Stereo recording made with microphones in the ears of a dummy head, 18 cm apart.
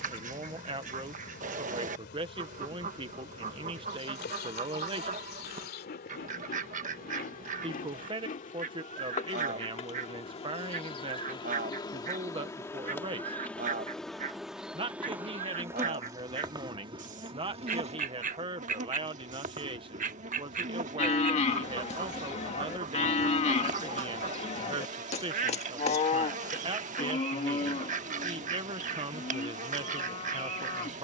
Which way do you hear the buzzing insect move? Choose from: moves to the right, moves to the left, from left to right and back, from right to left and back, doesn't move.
moves to the right.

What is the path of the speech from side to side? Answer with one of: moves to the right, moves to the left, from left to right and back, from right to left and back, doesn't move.
doesn't move.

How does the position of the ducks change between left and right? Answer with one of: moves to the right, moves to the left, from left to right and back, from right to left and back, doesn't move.
doesn't move.